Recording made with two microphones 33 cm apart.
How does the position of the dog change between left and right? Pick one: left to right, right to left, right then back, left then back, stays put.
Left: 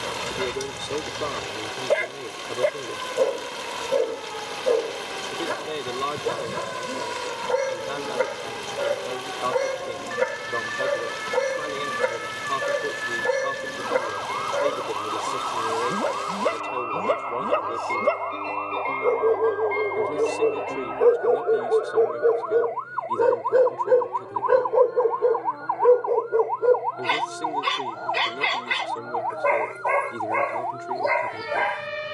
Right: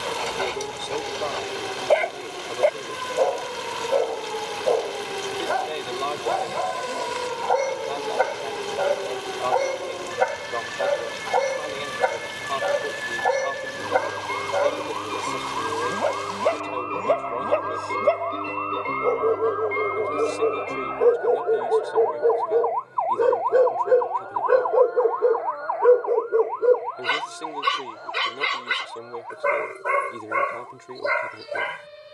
left to right.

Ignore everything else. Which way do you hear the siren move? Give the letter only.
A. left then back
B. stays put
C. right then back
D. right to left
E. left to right
D.